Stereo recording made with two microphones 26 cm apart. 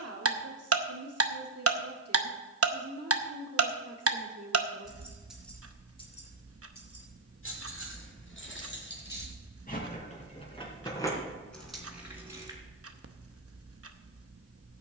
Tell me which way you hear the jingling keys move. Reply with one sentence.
In this clip you hear the jingling keys move from right to left and back again.